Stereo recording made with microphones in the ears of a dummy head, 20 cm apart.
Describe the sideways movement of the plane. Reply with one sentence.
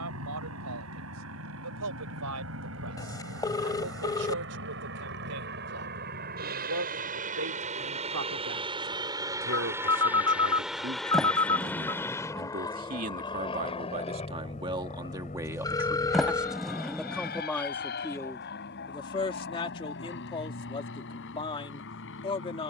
You can hear the plane go from the right side to the left.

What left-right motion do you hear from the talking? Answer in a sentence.
In this clip you hear the talking move to the left.